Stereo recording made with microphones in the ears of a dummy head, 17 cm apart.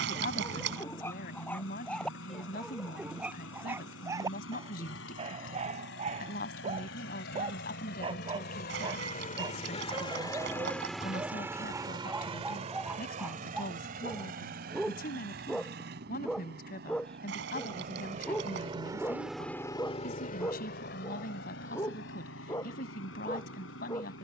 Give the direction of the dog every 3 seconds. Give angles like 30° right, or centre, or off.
10° left, 20° right, 30° right, 20° right, 10° right, centre, 10° left, 20° left.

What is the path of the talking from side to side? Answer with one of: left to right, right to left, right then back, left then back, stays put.
stays put.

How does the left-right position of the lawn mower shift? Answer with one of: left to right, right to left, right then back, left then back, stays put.
right then back.